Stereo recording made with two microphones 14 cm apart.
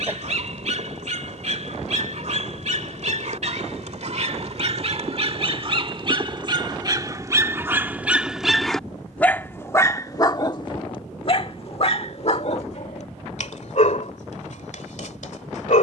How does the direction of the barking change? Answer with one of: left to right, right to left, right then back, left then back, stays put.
right to left.